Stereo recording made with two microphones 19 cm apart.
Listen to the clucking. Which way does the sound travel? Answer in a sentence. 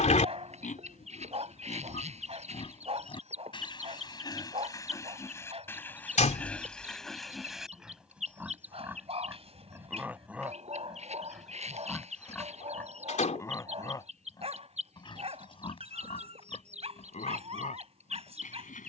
In this clip you hear the clucking stay in one place.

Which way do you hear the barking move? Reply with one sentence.
You can hear the barking stay put.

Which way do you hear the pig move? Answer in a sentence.
In this clip you hear the pig move from left to right and back again.